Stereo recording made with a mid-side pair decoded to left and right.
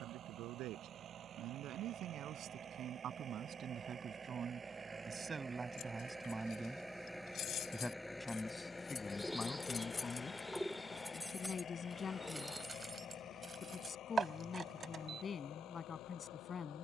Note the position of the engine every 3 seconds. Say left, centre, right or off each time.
right, right, centre, left, left, left.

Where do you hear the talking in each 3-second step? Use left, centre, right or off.
right, right, centre, left, left, left.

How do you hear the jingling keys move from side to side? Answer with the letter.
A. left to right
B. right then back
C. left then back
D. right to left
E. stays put
A.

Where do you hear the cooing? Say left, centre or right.
centre.